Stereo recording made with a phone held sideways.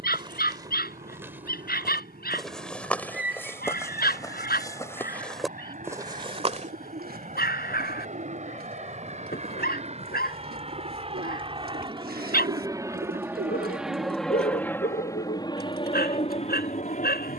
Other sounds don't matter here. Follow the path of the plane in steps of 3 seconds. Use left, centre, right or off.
right, right, right, right, centre, left.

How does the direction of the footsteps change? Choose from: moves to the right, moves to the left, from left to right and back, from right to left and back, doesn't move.
from right to left and back.